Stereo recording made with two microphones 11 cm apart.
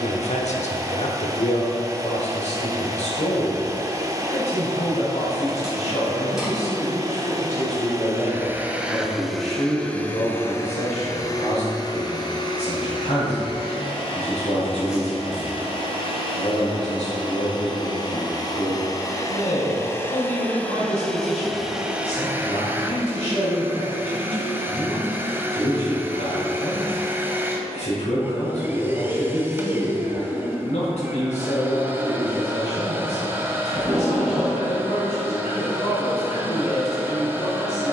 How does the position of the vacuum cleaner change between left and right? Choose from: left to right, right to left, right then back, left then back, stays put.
left then back.